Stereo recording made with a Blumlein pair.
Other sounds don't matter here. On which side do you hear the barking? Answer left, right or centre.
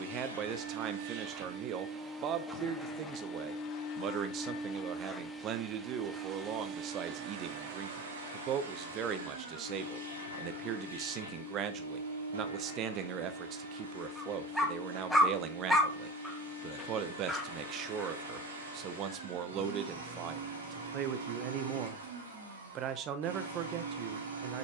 centre.